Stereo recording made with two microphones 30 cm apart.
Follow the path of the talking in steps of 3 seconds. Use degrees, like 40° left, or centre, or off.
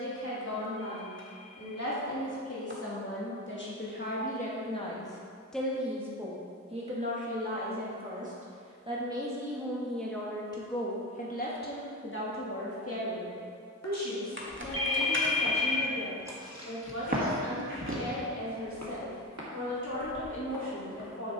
60° left, 20° left, 20° right, 10° left, 50° left, 70° left, 70° left.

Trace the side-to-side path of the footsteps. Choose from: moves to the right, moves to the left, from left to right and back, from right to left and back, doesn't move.
moves to the right.